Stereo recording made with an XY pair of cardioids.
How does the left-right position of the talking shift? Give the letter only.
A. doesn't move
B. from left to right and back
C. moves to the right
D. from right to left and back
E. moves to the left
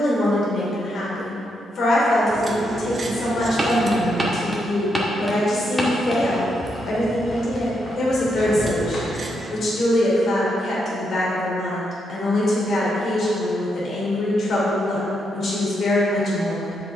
A.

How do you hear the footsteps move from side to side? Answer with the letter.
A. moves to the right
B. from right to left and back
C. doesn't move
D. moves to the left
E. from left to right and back
D.